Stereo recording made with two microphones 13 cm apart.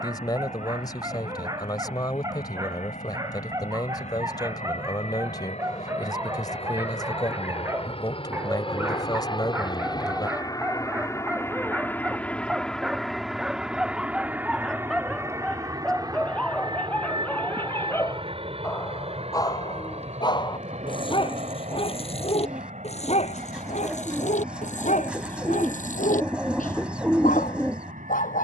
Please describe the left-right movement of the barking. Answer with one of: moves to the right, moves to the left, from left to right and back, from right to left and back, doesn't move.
moves to the left.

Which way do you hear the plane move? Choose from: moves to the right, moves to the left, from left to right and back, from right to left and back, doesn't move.
moves to the right.